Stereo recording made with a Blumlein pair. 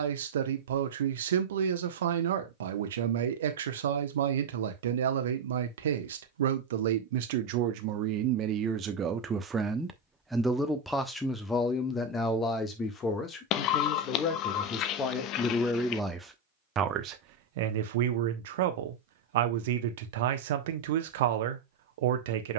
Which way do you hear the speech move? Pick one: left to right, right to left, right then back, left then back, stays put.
left then back.